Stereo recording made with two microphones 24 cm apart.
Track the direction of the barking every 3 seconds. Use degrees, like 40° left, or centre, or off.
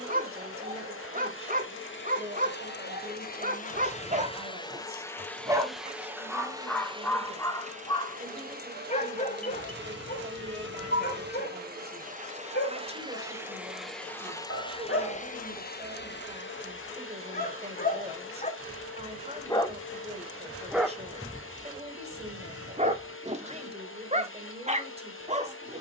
30° right, 30° right, 10° left, 40° left, 50° left, 40° left, 10° left, 20° right, 30° right.